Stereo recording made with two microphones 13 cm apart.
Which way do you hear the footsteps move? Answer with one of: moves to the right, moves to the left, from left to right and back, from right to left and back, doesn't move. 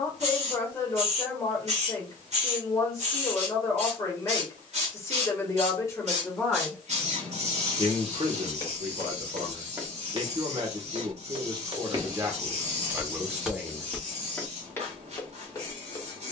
from left to right and back.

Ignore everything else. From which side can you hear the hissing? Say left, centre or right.
right.